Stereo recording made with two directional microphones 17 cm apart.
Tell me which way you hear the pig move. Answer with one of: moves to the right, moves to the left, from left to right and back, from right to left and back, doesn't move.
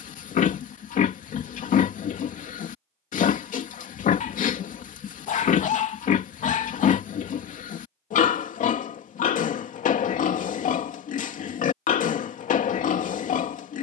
doesn't move.